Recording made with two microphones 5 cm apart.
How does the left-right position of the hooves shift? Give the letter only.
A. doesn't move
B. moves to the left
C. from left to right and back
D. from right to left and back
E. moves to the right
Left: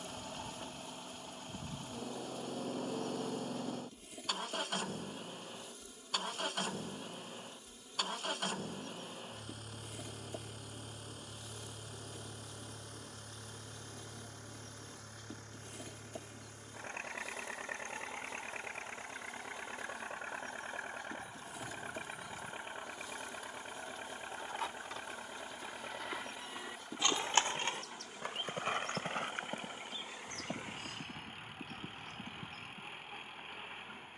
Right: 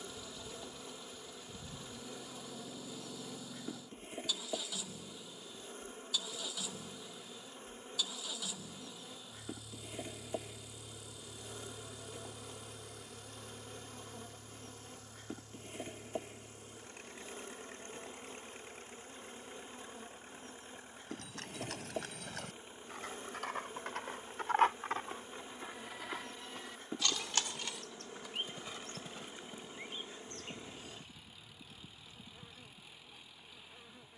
B.